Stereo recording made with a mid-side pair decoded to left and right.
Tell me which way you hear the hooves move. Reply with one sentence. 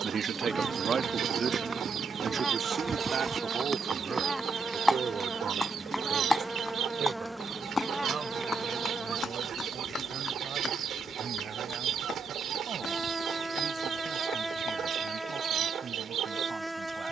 You can hear the hooves travel towards the left.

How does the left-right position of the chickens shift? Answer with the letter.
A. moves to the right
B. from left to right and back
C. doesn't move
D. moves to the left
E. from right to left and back
C.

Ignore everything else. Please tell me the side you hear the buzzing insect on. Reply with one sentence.
You can hear the buzzing insect in the centre.